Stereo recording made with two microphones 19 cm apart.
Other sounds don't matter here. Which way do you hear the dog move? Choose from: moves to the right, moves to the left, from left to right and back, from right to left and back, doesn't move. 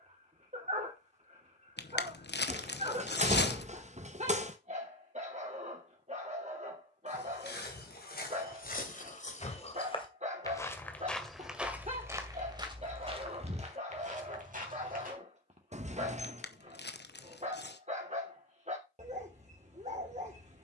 doesn't move.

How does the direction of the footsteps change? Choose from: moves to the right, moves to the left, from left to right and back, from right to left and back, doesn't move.
moves to the right.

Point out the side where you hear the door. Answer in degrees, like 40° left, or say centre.
40° right.